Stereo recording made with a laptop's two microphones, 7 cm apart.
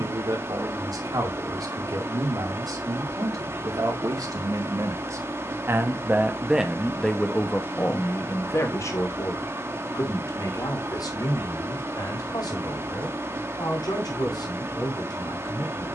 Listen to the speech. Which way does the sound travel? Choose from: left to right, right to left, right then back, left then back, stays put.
right to left.